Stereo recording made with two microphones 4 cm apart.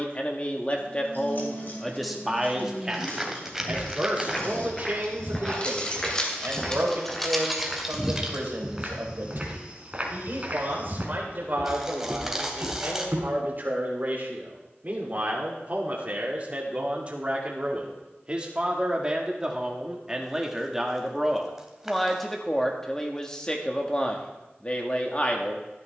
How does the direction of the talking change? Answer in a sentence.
In this clip you hear the talking move from left to right and back again.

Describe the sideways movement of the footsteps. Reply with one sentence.
In this clip you hear the footsteps move from left to right.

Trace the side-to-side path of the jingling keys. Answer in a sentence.
You can hear the jingling keys move from left to right.